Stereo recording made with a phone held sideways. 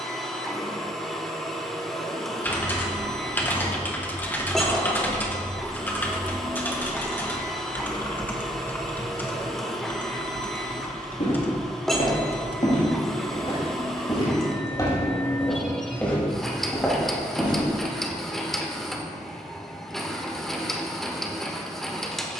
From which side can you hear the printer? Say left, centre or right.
centre.